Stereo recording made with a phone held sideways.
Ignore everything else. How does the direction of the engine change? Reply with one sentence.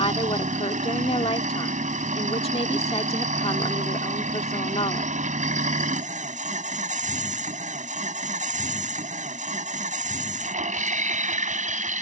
You can hear the engine stay put.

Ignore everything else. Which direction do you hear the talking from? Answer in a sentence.
In this clip you hear the talking on the left.